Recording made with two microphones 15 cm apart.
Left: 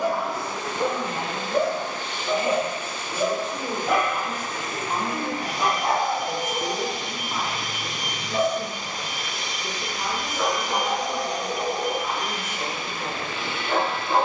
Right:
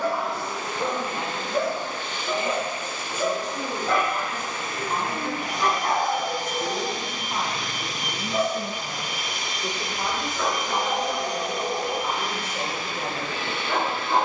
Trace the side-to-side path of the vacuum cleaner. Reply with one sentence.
In this clip you hear the vacuum cleaner travel towards the right.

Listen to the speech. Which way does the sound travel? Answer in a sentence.
In this clip you hear the speech travel towards the right.